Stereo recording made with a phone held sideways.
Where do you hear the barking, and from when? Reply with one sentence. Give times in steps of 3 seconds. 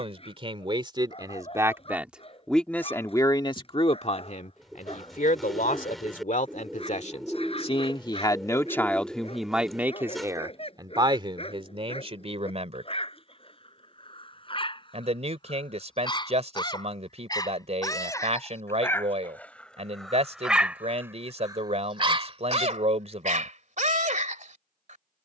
You can hear the barking on the left from 0 s, in the centre from 18 s and on the right from 21 s.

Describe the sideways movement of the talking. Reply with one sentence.
You can hear the talking go left and come back.